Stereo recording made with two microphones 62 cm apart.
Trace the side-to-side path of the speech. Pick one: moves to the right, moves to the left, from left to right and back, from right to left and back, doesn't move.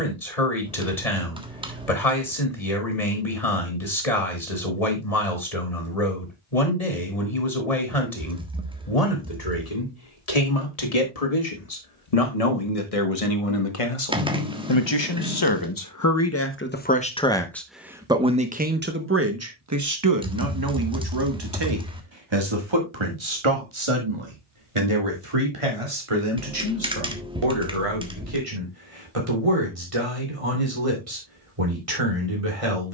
moves to the right.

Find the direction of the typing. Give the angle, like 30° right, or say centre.
10° right.